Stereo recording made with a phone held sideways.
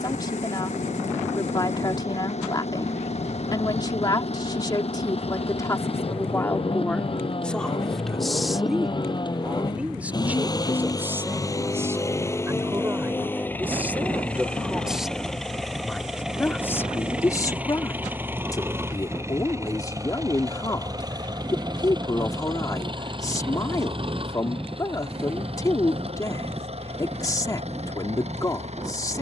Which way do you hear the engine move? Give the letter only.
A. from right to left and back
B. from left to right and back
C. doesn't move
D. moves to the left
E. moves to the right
E.